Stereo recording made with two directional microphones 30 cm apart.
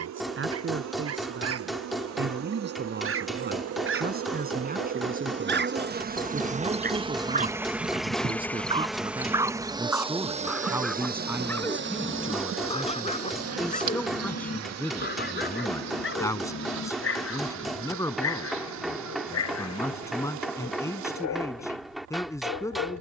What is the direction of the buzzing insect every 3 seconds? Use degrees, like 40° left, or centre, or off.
60° right, 50° right, 10° right, 20° right, 50° right, 60° right, 70° right, 70° right.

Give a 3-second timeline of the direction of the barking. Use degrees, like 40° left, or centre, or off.
50° right, 40° right, 20° right, centre, 20° left, 40° left, 60° left, 60° left.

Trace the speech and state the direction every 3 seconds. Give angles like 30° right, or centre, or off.
40° right, 30° right, 20° right, 10° right, centre, 10° left, 10° left, 10° left.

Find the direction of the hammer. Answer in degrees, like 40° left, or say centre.
centre.